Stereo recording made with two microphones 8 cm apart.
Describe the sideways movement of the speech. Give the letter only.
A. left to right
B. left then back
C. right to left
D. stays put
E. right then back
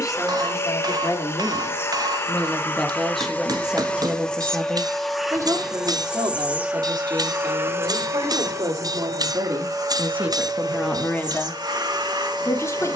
E.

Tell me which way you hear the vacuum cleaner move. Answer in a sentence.
You can hear the vacuum cleaner move from left to right.